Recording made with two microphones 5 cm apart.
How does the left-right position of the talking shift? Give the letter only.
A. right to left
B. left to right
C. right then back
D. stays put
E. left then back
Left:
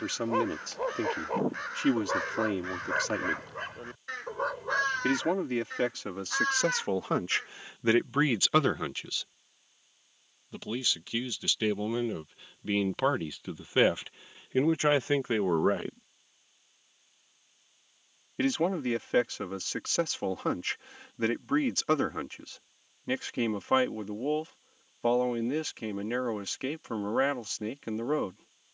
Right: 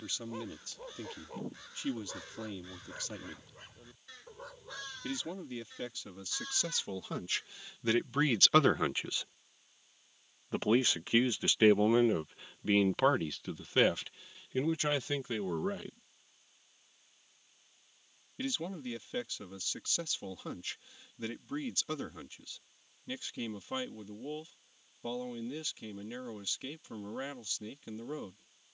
C.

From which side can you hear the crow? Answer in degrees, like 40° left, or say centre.
60° left.